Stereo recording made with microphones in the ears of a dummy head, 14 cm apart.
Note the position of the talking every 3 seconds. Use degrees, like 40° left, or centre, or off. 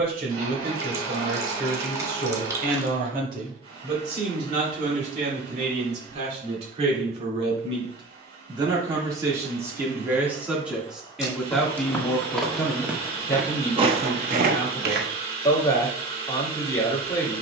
60° right, 50° right, 40° right, 10° right, 20° left, 20° left.